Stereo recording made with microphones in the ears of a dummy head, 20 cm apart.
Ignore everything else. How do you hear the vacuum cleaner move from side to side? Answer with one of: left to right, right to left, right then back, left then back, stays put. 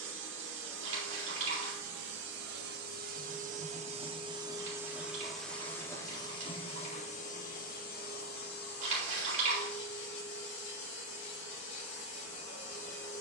right to left.